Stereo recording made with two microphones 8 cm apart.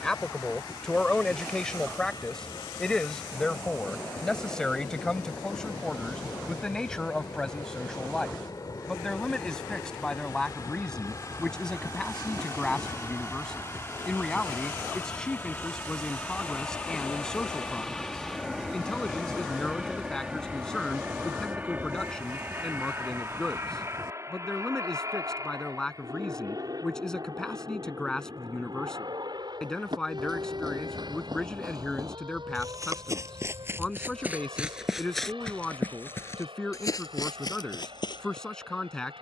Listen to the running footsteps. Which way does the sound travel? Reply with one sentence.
In this clip you hear the running footsteps move from right to left.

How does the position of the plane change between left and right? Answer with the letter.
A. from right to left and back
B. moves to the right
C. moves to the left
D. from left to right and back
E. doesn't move
B.